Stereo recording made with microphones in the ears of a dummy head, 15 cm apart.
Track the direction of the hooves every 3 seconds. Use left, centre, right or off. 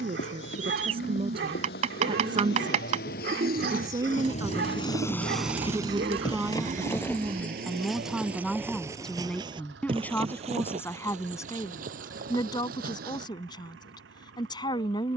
left, left, centre, right, right.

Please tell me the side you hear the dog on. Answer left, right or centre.
right.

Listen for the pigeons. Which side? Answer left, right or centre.
right.